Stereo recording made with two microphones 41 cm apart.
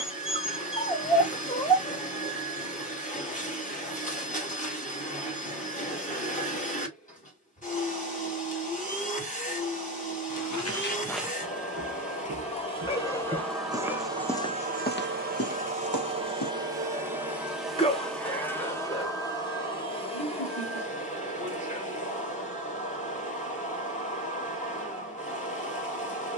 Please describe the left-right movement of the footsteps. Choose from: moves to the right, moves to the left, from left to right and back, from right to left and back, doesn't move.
from left to right and back.